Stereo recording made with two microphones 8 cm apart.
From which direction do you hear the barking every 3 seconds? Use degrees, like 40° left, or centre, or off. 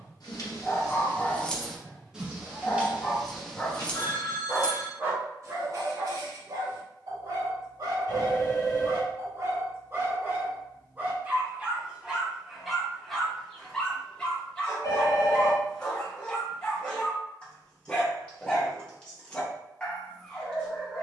20° left, 20° right, 50° right, 30° right, centre, 10° left, 10° left.